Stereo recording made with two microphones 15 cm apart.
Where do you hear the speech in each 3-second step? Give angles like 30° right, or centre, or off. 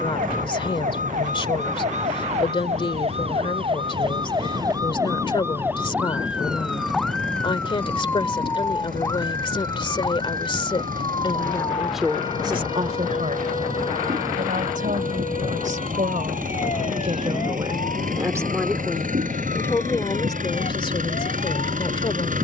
30° left, 30° left, 30° left, 30° left, 50° right, 50° right, 10° left, 30° left.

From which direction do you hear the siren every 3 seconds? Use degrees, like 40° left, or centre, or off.
50° right, 30° right, 10° left, 30° left, 40° left, 50° left, 50° left, 50° left.